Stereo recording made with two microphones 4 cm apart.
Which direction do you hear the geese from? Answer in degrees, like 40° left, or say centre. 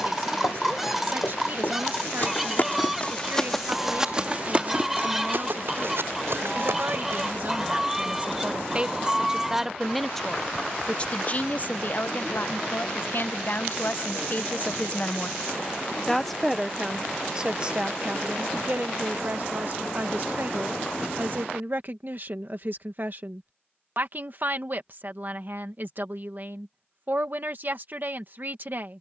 centre.